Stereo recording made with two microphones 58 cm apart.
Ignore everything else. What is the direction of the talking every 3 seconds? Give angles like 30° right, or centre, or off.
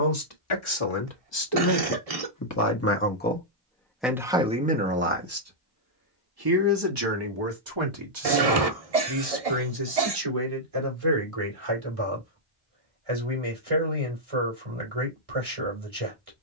40° left, centre, 50° right, 60° right, 70° right, 70° right.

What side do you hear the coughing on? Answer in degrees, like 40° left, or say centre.
80° right.